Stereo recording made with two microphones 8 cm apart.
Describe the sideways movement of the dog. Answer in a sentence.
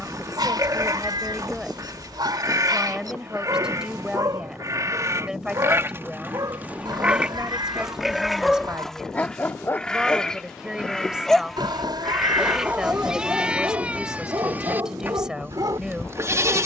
In this clip you hear the dog go left and come back.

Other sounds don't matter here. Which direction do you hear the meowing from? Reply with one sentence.
You can hear the meowing on the right.